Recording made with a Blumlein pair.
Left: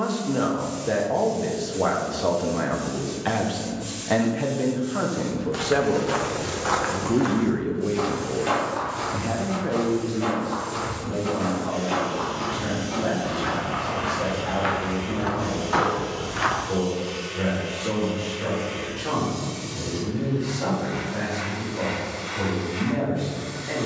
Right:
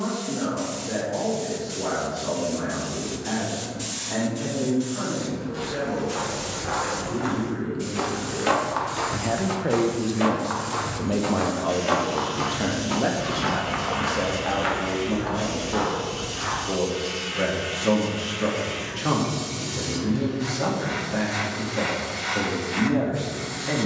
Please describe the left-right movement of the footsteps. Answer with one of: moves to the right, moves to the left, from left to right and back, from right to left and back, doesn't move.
from left to right and back.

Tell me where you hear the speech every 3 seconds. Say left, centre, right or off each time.
left, left, left, right, right, right, right, right.